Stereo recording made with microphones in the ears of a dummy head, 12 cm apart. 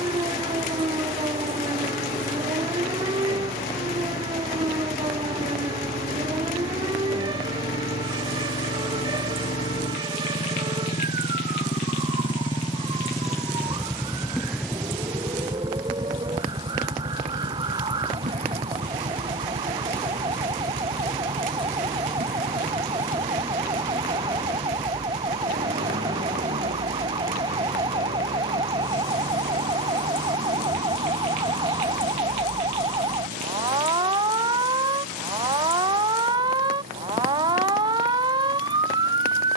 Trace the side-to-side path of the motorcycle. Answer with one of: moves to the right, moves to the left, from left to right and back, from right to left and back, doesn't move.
moves to the right.